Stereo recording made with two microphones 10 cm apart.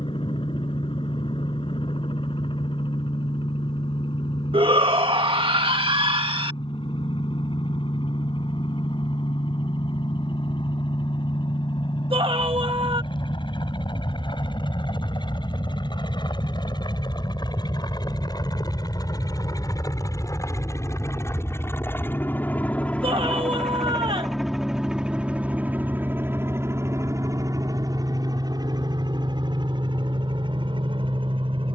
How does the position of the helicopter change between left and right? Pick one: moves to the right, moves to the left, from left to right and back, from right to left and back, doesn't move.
moves to the right.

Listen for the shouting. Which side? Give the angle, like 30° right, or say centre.
70° right.